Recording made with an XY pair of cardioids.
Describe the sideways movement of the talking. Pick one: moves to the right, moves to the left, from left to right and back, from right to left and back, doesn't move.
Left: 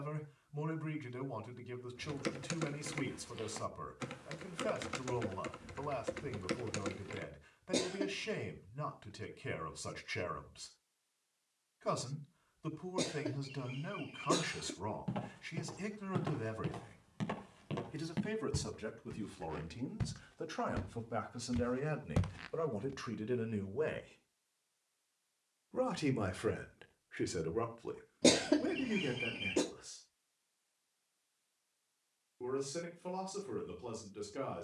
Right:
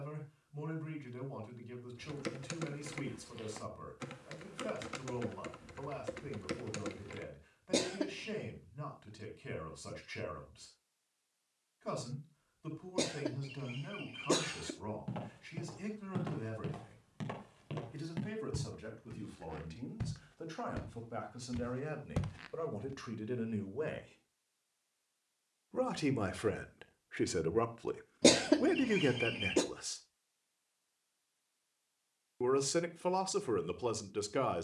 moves to the right.